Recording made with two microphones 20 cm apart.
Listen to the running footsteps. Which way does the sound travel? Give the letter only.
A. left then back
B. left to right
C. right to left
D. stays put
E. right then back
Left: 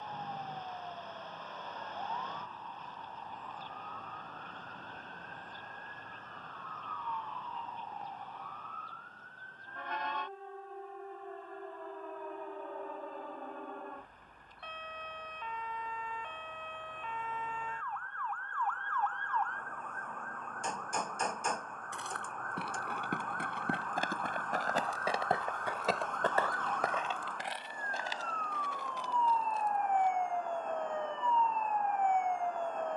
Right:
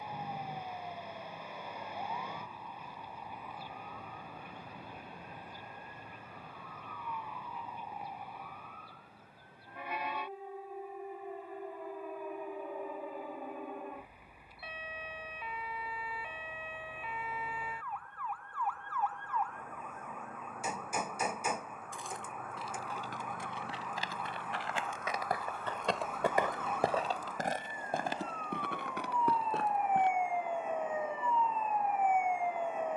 B.